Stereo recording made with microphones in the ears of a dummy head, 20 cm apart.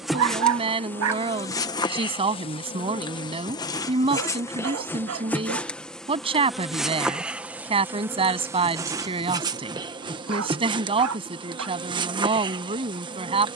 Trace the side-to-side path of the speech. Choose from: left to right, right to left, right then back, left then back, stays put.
stays put.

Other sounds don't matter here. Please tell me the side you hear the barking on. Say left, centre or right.
right.